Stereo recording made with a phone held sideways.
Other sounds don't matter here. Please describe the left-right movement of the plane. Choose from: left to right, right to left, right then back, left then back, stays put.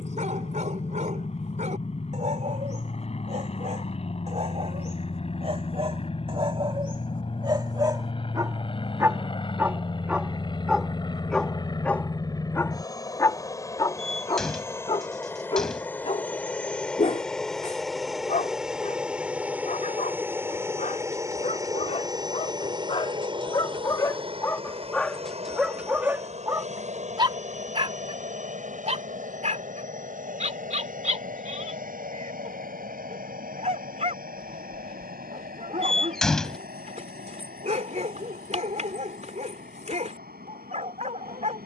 left to right.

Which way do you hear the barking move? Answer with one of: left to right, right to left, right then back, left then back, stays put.
left then back.